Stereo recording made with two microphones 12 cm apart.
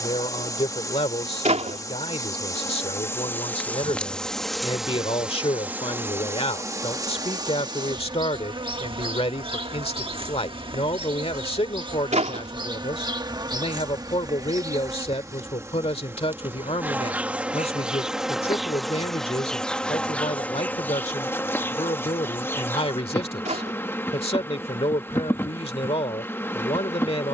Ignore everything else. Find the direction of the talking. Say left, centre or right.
left.